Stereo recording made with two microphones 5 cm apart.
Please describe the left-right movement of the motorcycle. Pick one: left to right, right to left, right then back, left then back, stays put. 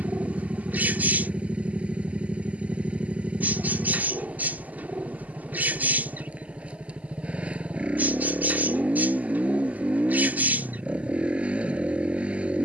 stays put.